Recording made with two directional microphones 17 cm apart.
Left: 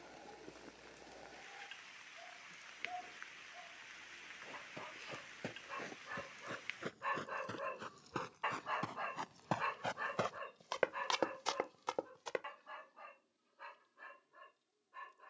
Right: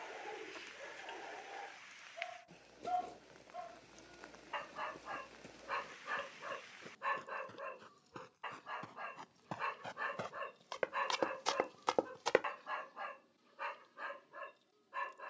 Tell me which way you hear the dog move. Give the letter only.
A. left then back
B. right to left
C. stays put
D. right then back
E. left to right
A.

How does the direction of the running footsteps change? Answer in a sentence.
In this clip you hear the running footsteps move to the right.